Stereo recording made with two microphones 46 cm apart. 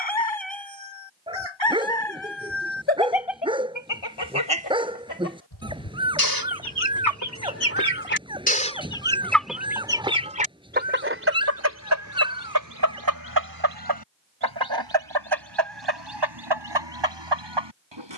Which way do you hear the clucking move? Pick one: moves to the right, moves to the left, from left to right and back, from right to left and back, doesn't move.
moves to the right.